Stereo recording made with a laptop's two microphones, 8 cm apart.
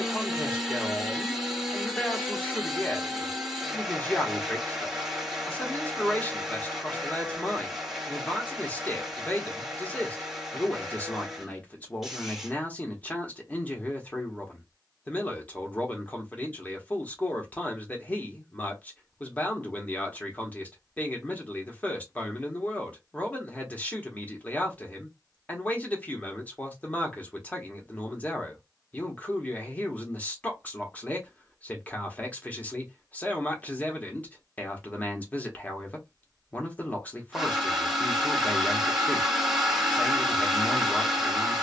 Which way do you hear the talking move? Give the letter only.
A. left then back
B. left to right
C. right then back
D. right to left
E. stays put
E.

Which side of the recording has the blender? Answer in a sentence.
You can hear the blender in the centre.